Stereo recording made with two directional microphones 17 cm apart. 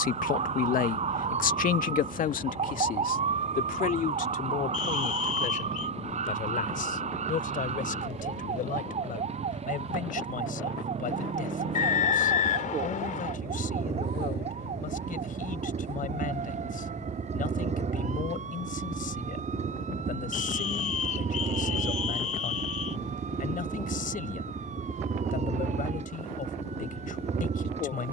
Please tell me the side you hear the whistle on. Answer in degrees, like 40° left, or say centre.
50° left.